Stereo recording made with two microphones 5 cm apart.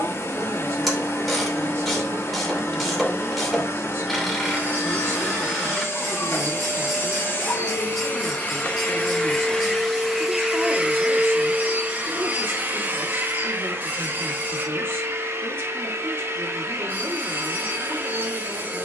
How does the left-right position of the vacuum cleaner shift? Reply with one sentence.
You can hear the vacuum cleaner travel towards the right.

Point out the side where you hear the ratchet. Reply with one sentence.
You can hear the ratchet in the centre.